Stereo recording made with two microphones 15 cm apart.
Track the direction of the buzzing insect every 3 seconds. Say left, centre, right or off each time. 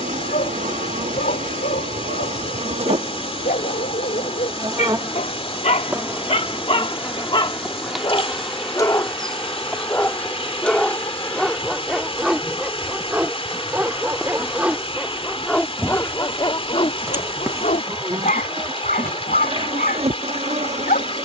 right, right, centre, centre, centre, centre, right.